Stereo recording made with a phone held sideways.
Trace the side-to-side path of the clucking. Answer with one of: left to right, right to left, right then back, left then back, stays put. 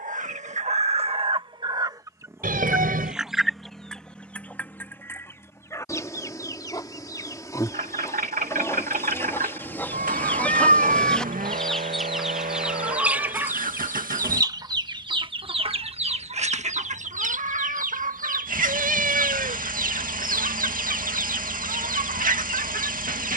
left then back.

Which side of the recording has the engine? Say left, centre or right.
right.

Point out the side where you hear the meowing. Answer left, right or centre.
right.